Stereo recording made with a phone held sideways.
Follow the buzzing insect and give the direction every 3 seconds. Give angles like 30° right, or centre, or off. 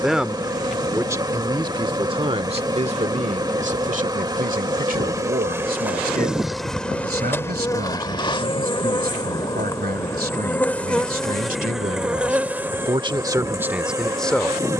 30° right, 20° right, 20° left, 10° left, 20° right.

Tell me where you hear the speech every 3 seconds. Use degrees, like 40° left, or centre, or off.
30° right, 60° right, 70° right, 70° right, 10° right.